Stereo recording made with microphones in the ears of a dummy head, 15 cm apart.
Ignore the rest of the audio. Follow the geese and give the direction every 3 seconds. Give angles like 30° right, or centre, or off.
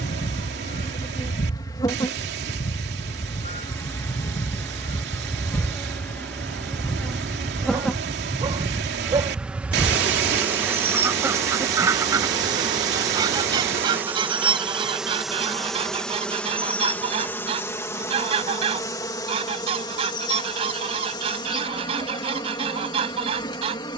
50° left, 30° left, 10° left, 10° right, 30° right, 30° right, 30° right, 30° right.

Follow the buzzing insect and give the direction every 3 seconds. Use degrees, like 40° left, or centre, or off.
20° left, 10° left, centre, 10° right, 10° right, 10° left, 20° left, 30° left.